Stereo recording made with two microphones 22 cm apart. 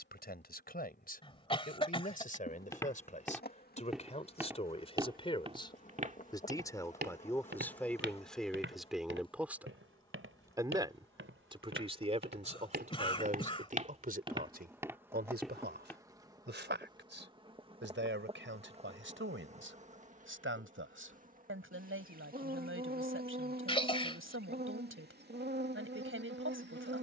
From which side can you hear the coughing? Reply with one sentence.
You can hear the coughing on the left.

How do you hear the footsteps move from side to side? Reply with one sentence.
You can hear the footsteps go right and come back.